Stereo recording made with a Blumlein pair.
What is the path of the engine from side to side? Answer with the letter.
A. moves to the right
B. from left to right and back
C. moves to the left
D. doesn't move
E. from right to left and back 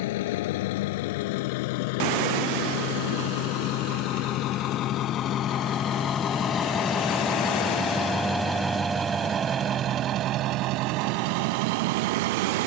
A.